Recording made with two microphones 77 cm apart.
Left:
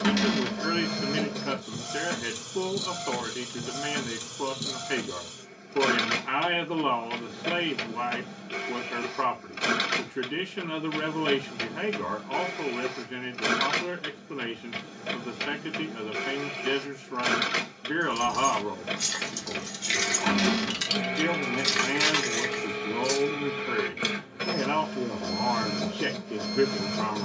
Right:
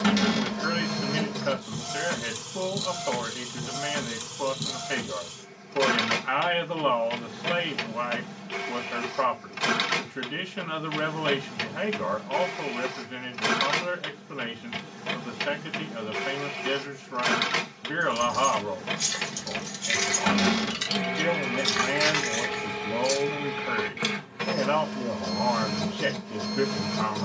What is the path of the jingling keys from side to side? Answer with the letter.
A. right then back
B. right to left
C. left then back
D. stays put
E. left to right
B.